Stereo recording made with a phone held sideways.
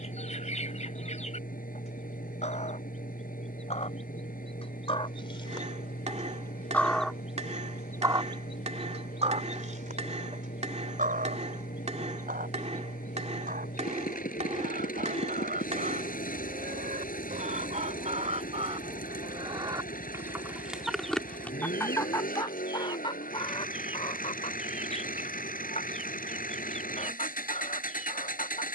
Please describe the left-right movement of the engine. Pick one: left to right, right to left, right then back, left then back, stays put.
stays put.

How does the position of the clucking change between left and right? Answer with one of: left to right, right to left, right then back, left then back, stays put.
right then back.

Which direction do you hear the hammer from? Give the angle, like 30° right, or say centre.
50° right.